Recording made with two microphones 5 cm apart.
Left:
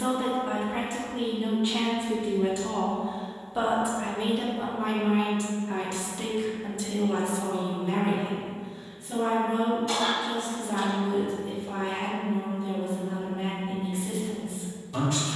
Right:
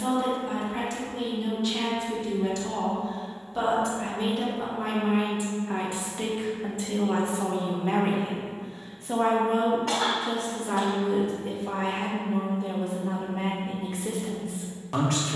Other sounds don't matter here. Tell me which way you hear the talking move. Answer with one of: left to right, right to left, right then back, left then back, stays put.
left to right.